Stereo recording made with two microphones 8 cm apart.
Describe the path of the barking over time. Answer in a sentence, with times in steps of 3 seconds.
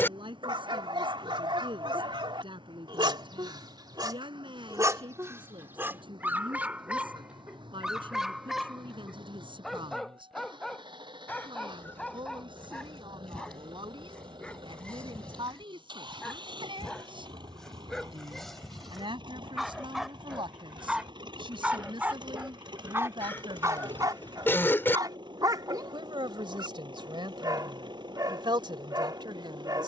In this clip you hear the barking on the right from 0 s, in the centre from 6 s and on the right from 21 s.